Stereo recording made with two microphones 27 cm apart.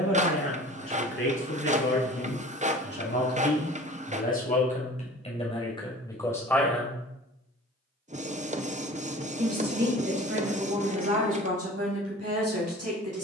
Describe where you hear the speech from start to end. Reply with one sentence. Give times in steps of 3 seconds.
You can hear the speech on the left from 0 s, in the centre from 6 s and on the right from 9 s.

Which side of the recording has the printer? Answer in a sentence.
In this clip you hear the printer on the right.